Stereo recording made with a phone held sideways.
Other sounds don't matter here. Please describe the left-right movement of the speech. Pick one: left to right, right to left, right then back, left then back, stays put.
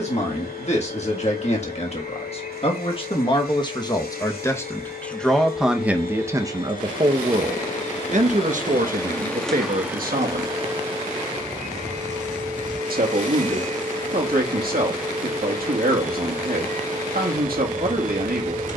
left to right.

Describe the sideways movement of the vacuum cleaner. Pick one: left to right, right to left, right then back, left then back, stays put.
left to right.